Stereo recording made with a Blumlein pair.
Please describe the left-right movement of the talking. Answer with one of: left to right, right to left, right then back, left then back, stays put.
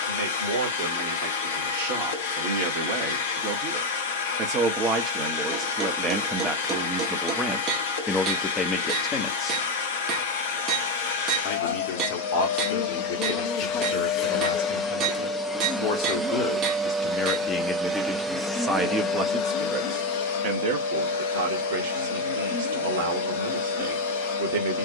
left then back.